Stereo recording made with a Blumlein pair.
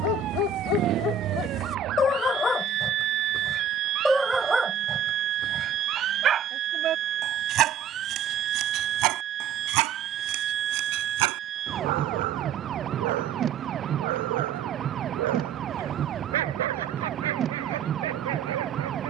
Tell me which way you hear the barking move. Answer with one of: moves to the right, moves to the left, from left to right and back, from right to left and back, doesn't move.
moves to the right.